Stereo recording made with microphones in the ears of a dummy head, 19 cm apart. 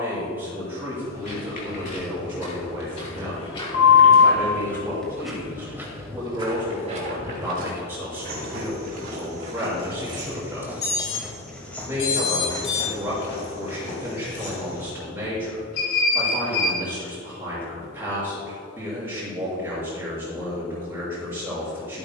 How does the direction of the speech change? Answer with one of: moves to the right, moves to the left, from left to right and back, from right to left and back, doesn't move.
doesn't move.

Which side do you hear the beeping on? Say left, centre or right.
left.